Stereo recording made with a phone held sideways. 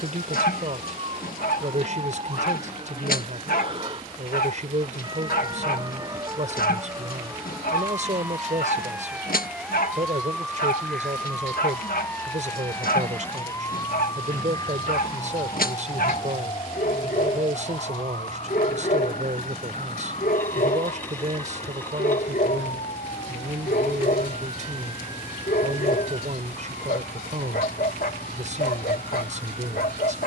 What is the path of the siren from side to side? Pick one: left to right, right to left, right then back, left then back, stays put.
right to left.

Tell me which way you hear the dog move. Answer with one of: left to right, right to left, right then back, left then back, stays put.
stays put.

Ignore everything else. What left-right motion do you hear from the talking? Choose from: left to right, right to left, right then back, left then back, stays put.
stays put.